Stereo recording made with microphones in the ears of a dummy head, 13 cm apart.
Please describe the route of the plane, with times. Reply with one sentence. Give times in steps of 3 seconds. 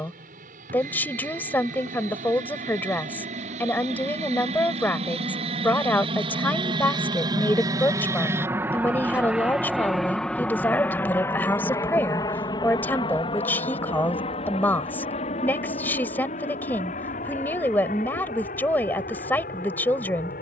In this clip you hear the plane on the right from 0 s, in the centre from 9 s and on the left from 12 s.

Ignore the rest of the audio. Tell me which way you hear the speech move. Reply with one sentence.
You can hear the speech stay in one place.